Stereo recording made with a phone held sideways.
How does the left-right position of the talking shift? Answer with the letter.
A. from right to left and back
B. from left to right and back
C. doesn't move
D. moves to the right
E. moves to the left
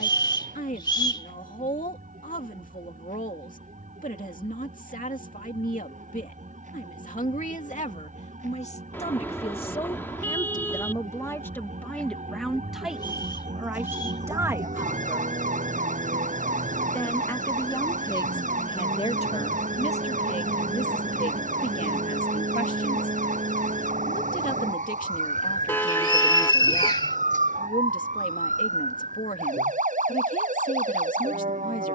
B.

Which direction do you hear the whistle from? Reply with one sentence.
In this clip you hear the whistle on the left.